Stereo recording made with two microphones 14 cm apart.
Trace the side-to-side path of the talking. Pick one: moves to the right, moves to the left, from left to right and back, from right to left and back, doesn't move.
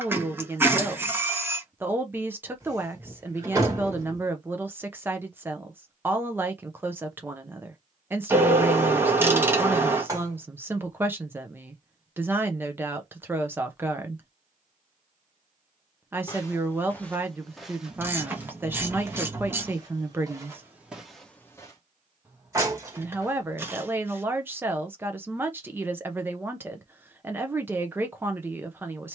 doesn't move.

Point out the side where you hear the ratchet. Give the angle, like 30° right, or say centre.
20° right.